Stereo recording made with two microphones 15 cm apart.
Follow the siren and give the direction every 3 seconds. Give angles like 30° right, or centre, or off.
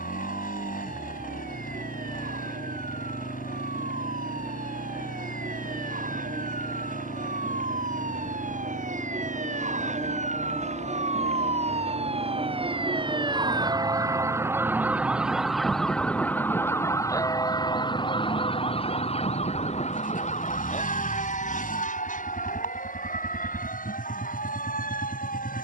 80° right, 70° right, 70° right, 60° right, 30° right, 10° left, 40° left, 60° left, 60° left.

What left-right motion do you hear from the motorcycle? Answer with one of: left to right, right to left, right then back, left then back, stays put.
stays put.